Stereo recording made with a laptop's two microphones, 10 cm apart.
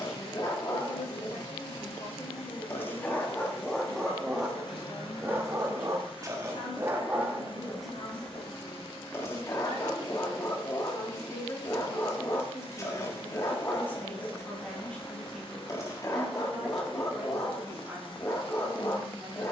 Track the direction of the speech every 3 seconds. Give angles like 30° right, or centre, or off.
70° left, 60° left, 50° left, 40° left, 20° left, centre, 10° right.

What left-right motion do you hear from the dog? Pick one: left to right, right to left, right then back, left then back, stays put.
right then back.